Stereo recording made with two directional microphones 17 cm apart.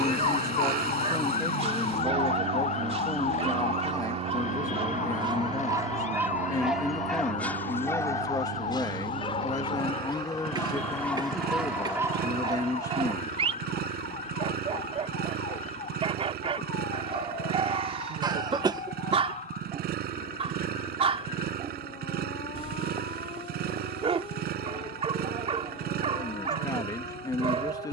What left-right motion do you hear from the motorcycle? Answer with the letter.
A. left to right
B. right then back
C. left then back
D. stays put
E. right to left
D.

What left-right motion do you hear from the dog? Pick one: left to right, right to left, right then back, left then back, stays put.
left then back.